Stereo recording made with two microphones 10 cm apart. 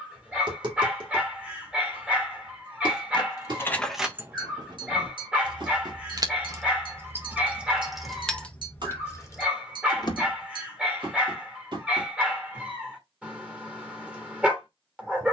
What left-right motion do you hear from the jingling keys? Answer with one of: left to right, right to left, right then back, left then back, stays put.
right then back.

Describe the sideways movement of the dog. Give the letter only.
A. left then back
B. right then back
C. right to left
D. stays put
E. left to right
D.